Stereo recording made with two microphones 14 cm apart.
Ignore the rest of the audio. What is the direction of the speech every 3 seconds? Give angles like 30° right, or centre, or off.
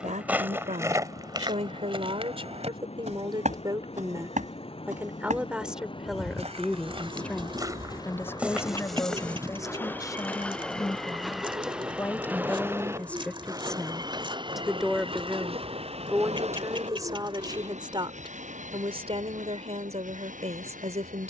50° right, 20° right, 10° left, 20° left, 10° left, 20° right, 50° right.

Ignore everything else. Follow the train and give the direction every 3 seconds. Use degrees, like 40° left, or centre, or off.
50° left, 50° left, 30° left, 10° left, 30° right, 50° right, 70° right.